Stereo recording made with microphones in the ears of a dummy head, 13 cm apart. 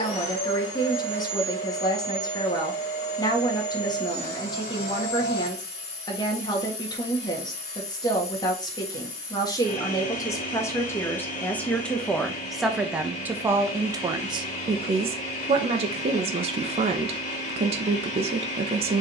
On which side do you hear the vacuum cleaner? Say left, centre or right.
left.